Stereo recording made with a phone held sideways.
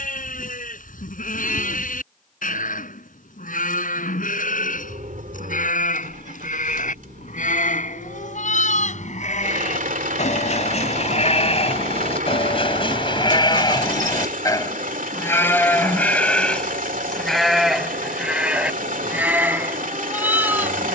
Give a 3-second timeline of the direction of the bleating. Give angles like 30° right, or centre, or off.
80° left, 80° left, 70° left, 60° left, 30° left, 10° left, 10° right.